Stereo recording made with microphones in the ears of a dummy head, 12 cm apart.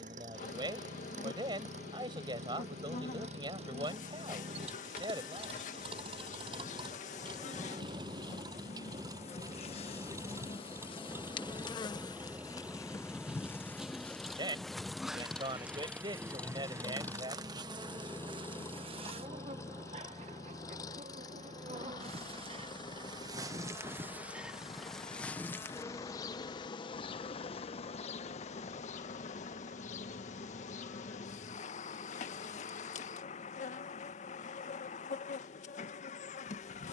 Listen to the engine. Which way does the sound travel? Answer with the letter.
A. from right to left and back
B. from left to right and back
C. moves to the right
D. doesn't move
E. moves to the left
E.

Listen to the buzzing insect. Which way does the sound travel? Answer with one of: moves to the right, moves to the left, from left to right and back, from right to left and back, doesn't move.
from left to right and back.